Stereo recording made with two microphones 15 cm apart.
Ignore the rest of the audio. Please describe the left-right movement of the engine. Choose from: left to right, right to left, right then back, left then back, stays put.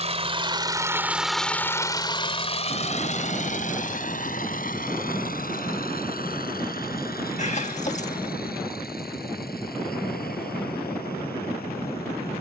right to left.